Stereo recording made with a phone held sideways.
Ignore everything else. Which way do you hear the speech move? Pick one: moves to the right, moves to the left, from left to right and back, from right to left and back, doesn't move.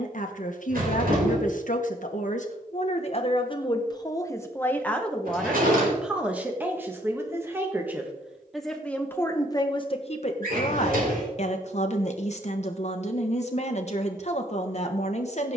from left to right and back.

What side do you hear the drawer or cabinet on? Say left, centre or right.
right.